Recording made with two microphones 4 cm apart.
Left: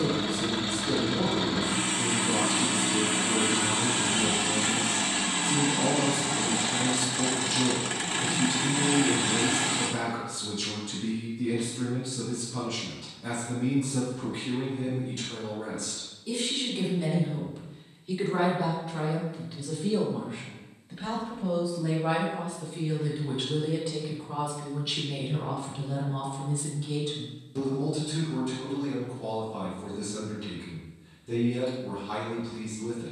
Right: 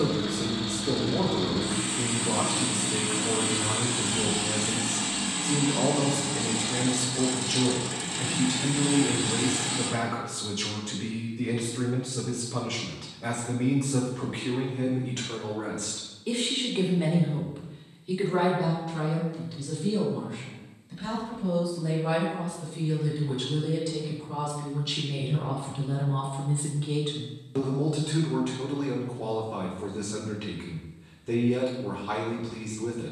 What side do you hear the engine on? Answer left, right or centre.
left.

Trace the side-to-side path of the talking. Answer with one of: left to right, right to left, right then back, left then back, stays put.
left then back.